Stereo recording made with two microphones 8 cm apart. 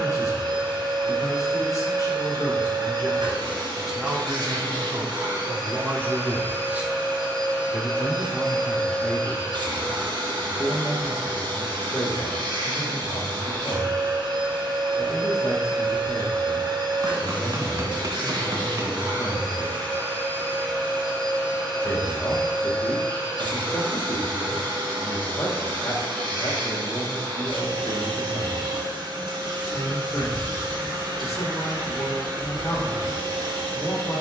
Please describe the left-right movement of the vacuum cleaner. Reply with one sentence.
In this clip you hear the vacuum cleaner stay put.